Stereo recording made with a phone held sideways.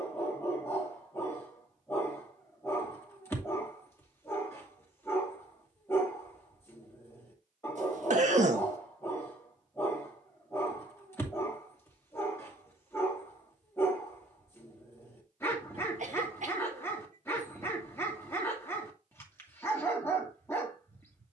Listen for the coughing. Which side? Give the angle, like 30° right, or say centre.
60° right.